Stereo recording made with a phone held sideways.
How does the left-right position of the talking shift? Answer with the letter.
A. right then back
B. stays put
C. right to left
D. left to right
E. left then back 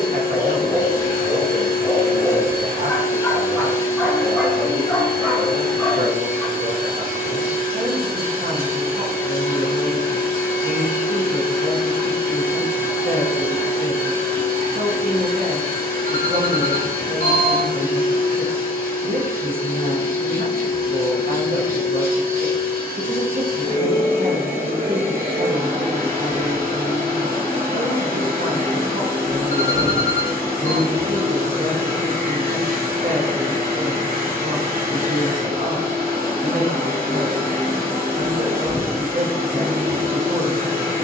B.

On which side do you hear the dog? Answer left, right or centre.
centre.